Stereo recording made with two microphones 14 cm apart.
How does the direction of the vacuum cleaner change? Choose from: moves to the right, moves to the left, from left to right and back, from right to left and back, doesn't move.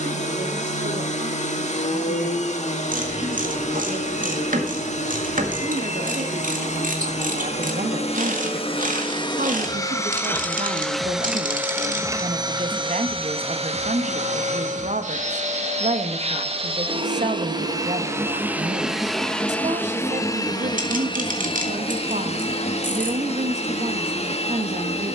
from left to right and back.